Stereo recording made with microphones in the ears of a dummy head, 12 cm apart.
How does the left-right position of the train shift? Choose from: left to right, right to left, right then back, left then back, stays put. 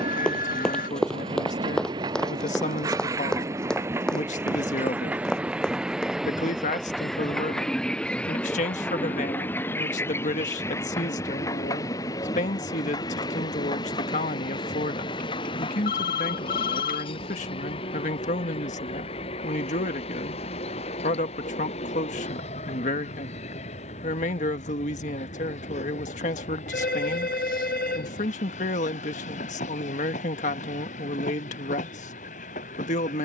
right to left.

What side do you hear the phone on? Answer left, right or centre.
left.